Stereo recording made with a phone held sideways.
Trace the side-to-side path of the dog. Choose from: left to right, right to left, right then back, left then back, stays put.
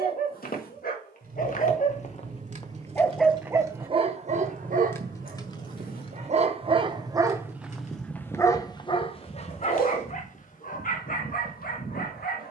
right then back.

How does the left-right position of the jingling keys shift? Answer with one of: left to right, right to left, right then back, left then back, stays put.
right to left.